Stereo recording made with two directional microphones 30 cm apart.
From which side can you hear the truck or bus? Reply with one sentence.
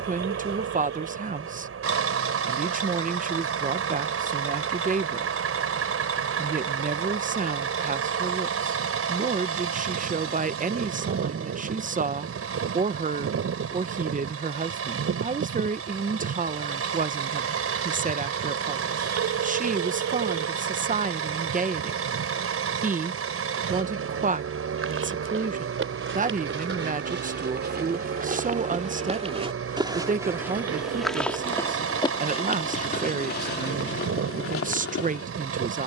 In this clip you hear the truck or bus on the right.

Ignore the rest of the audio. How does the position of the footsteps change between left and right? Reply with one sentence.
In this clip you hear the footsteps go from the right side to the left.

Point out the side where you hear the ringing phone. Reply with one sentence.
In this clip you hear the ringing phone on the right.